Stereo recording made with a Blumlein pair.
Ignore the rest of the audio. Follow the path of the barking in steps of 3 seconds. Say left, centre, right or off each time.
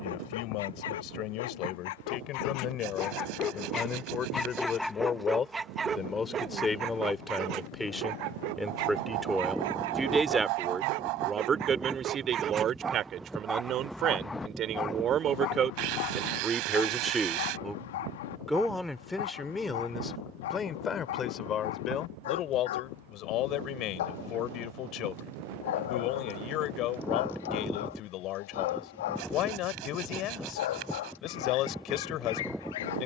left, centre, right, right, centre, left, left, left, left, left, left.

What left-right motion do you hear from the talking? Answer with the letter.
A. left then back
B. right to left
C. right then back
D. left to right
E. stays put
C.